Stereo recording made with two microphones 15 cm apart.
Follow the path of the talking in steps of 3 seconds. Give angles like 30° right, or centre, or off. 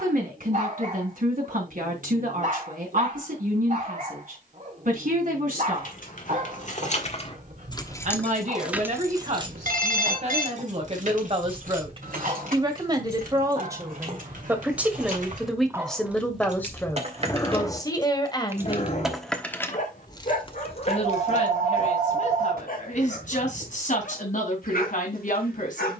60° right, 60° right, 50° right, 40° right, 20° right, 10° left, 30° left, 50° left, 60° left.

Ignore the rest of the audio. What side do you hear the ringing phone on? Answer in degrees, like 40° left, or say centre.
70° right.